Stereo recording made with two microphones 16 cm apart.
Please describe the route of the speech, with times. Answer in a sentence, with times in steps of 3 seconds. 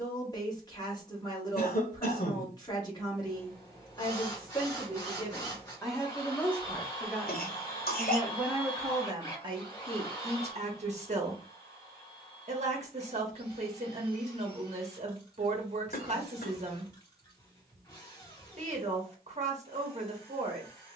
You can hear the speech on the left from 0 s, in the centre from 6 s and on the right from 9 s.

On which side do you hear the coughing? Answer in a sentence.
In this clip you hear the coughing on the left.